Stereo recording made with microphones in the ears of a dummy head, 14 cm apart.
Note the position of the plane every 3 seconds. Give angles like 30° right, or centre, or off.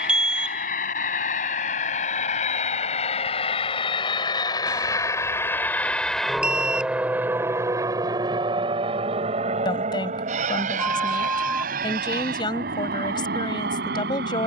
50° left, 30° left, 20° right, 50° right, 60° right.